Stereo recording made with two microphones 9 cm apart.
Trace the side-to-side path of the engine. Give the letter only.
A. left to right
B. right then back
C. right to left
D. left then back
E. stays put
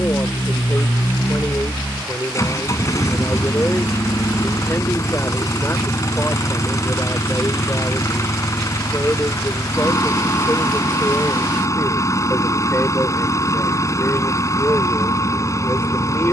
E.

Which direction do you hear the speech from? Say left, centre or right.
left.